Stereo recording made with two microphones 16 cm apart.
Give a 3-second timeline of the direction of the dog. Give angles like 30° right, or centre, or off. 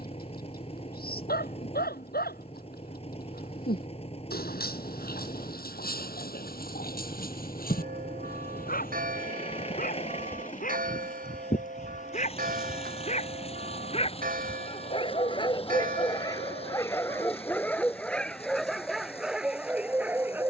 80° left, 80° left, 70° left, 60° left, 40° left, 20° left, centre.